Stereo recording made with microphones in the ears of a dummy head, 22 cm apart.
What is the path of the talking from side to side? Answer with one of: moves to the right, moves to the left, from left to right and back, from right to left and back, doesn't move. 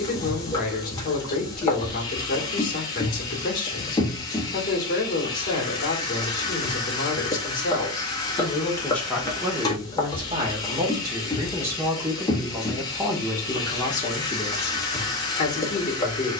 from left to right and back.